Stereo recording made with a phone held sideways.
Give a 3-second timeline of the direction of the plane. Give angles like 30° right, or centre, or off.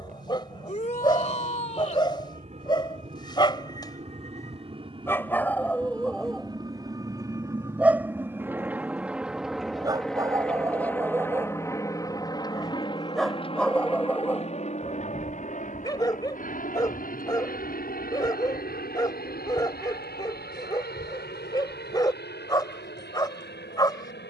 50° right, 40° right, 20° right, 10° left, 30° left, 50° left, 60° left, 70° left.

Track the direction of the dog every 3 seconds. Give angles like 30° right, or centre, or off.
30° left, 20° left, 10° right, 20° right, 10° left, 20° left, 20° left, 20° left.